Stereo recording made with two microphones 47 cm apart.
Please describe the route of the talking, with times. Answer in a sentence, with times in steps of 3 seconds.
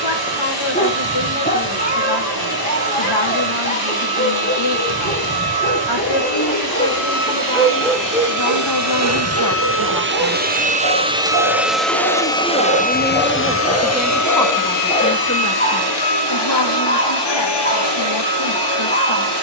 You can hear the talking on the left from 0 s, in the centre from 12 s and on the left from 15 s.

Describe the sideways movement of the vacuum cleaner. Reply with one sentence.
You can hear the vacuum cleaner travel towards the left.